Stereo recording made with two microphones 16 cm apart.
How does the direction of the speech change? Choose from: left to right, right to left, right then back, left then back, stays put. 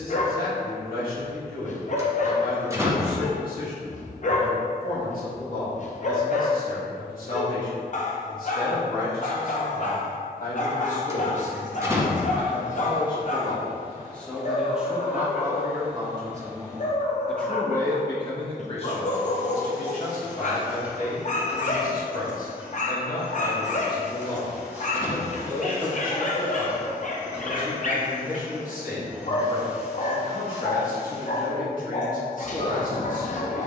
right then back.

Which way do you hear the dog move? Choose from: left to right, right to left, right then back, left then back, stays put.
stays put.